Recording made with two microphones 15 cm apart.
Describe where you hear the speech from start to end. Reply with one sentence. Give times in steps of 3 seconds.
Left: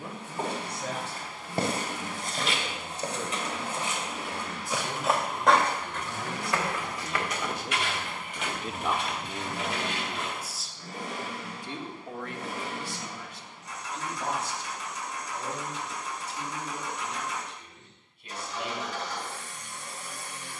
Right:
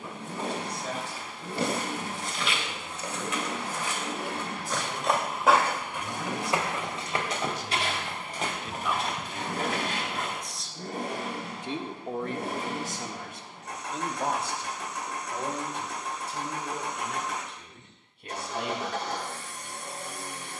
In this clip you hear the speech on the left from 0 s, in the centre from 9 s and on the right from 12 s.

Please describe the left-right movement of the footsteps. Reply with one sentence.
You can hear the footsteps travel towards the right.